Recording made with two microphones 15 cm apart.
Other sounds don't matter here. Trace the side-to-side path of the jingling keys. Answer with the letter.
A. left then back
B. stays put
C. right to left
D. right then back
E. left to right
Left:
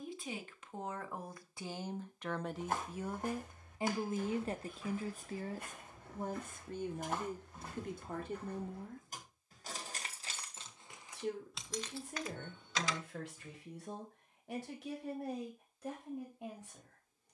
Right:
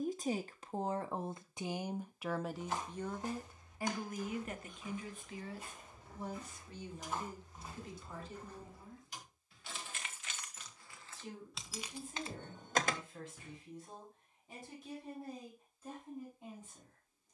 E.